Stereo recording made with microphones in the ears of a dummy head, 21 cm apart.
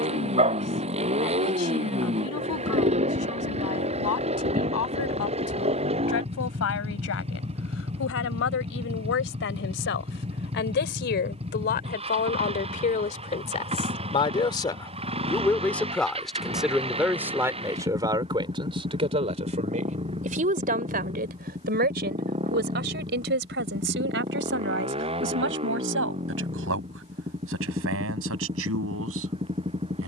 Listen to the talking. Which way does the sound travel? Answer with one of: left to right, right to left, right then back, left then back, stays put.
left to right.